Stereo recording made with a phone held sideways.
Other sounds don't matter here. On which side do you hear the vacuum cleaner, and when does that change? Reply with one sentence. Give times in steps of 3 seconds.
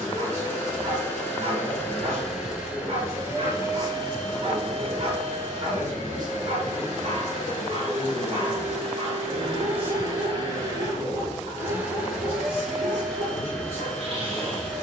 In this clip you hear the vacuum cleaner in the centre from 0 s, on the right from 3 s and in the centre from 12 s.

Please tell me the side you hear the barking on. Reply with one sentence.
In this clip you hear the barking on the right.